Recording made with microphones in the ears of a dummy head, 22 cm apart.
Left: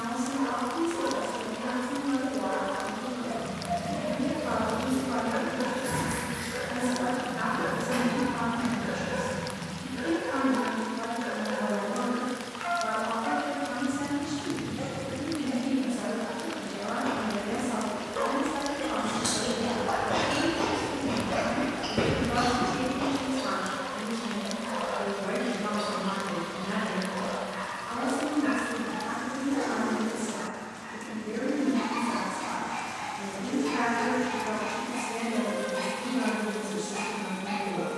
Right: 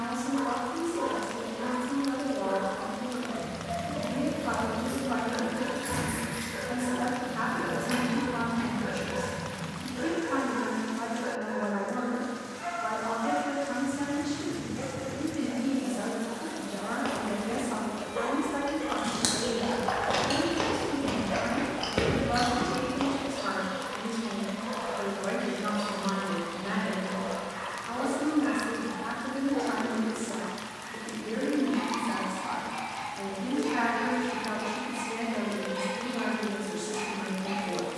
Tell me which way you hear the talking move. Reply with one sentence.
In this clip you hear the talking stay in one place.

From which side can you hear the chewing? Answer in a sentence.
In this clip you hear the chewing on the right.